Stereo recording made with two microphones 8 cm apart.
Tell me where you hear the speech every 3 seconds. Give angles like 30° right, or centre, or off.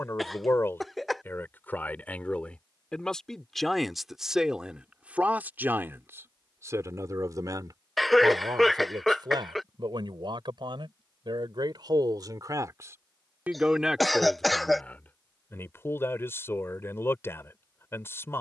20° left, 10° right, 40° right, 60° right, 20° right, 30° left.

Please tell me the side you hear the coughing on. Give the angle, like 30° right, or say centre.
centre.